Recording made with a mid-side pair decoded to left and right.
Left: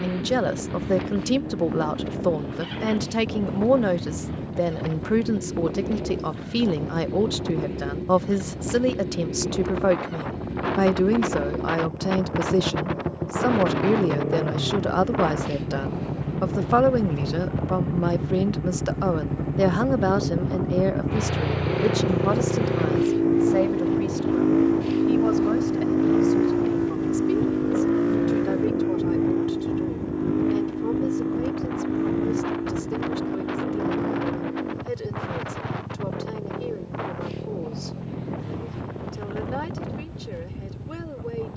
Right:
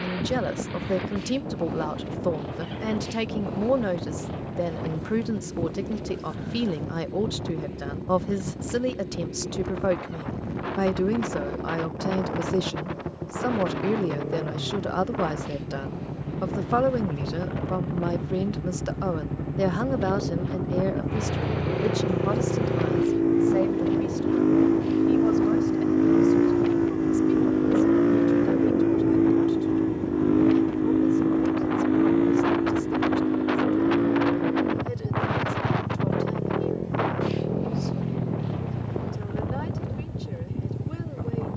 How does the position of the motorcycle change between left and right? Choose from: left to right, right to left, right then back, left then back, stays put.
left to right.